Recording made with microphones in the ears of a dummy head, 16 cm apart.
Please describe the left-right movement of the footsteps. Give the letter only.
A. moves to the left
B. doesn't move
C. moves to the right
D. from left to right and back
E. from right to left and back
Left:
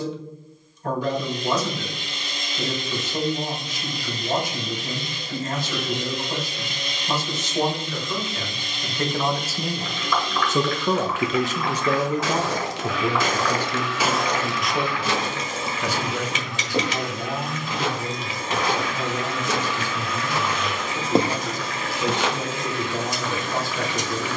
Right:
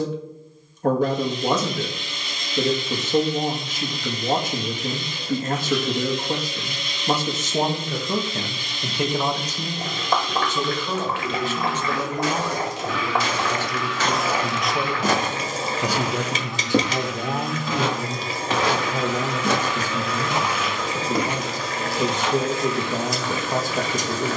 D.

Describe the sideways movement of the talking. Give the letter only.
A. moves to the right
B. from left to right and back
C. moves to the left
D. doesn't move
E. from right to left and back
E.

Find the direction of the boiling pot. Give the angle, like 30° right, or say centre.
30° right.